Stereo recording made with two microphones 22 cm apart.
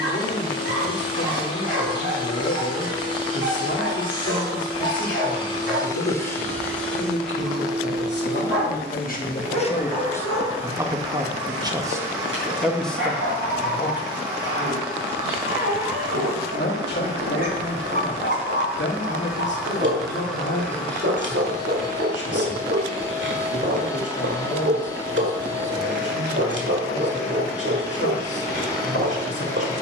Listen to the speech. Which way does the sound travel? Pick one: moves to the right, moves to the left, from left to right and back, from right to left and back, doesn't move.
from left to right and back.